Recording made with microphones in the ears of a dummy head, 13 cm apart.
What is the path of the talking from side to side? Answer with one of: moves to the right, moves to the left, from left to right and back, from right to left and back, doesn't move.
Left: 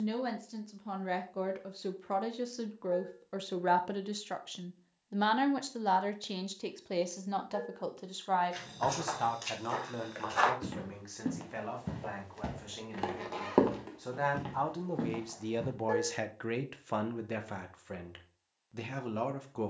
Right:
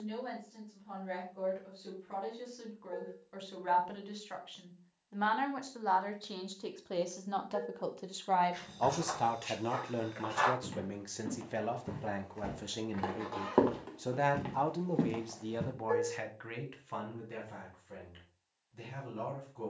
from left to right and back.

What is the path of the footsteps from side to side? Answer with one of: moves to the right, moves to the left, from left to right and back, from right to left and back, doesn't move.
moves to the right.